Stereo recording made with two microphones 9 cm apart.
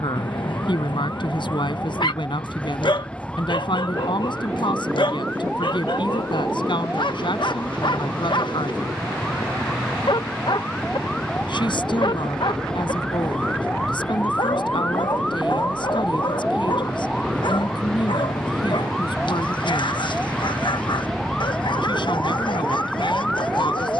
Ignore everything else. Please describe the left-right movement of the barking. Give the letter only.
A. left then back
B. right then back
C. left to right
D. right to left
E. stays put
E.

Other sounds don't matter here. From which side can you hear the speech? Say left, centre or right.
left.